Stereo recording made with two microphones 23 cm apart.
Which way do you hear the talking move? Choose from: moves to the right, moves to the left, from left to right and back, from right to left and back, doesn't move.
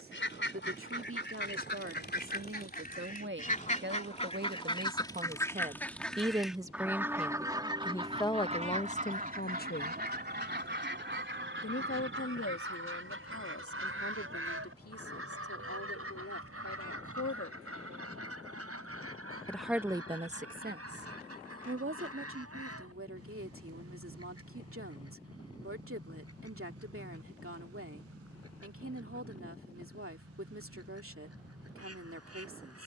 from right to left and back.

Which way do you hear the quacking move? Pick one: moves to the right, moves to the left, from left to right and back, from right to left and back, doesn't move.
moves to the right.